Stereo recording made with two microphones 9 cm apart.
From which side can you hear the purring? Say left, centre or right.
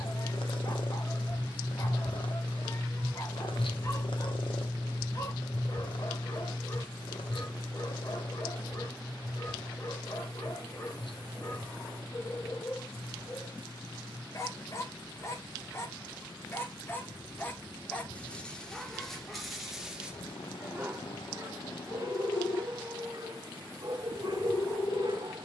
left.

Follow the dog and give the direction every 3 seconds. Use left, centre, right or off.
left, left, left, left, left, left, centre, right, right.